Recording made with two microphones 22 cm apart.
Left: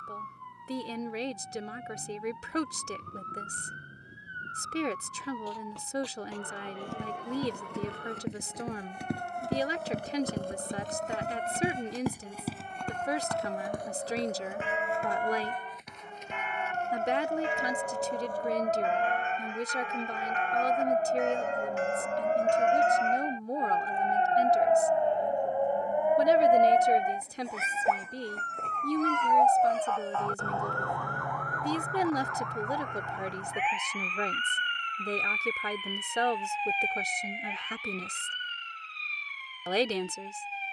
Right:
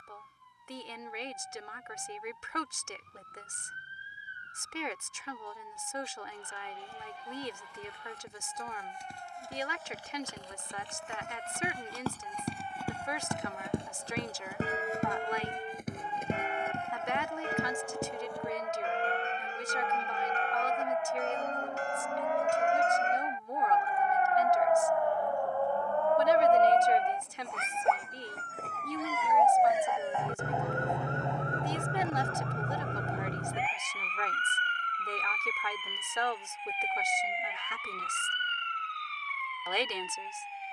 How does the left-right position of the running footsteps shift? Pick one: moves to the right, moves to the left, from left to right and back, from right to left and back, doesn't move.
moves to the right.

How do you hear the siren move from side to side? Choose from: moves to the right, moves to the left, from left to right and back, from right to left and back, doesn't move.
moves to the right.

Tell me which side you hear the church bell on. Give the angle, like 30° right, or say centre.
40° right.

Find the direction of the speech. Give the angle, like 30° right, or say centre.
40° left.